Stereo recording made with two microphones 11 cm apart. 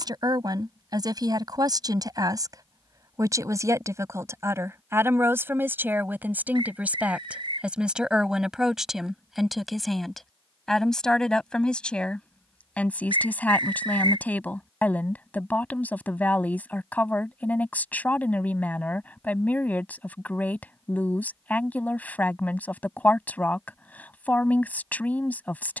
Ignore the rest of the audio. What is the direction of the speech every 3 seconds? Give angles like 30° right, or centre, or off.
40° right, 20° right, 10° right, centre, 10° left, 20° left, 20° left, 20° left, 20° left.